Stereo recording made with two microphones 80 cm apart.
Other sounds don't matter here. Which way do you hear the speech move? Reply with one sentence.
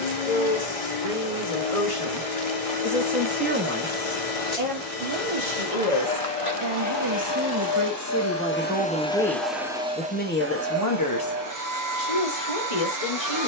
In this clip you hear the speech go right and come back.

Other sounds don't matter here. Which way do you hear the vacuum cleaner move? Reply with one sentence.
In this clip you hear the vacuum cleaner move from left to right.